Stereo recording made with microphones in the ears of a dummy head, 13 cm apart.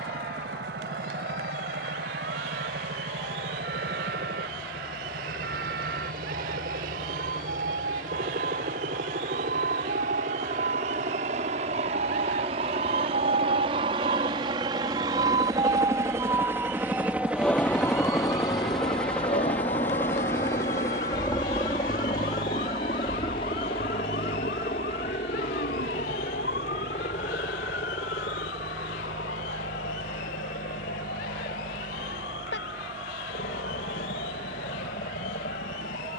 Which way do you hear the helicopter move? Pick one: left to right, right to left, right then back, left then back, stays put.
right to left.